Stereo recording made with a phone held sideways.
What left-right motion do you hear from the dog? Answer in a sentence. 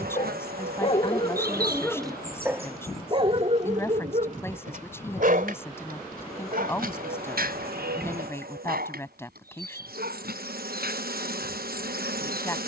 You can hear the dog travel towards the right.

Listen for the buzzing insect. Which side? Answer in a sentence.
You can hear the buzzing insect on the right.